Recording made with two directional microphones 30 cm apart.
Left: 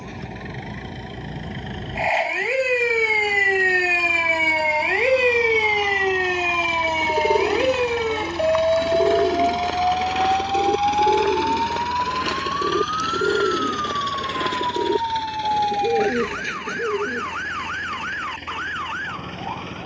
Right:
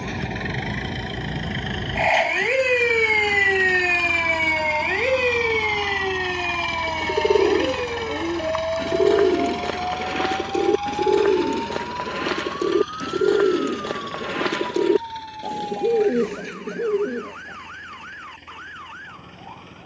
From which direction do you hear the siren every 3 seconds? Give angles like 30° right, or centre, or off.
30° right, 10° left, 40° left, 50° left, 60° left, 60° left, 70° left.